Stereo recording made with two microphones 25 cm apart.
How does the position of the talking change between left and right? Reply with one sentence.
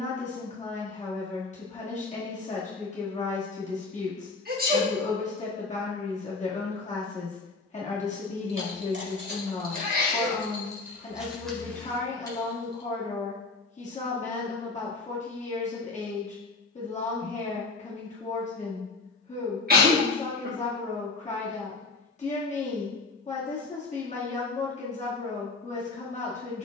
In this clip you hear the talking stay put.